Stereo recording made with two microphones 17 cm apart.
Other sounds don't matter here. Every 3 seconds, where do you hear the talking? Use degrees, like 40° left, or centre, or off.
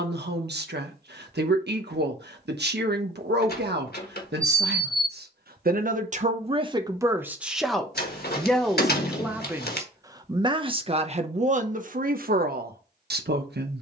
80° right, 70° right, 10° right, 30° right, 70° right.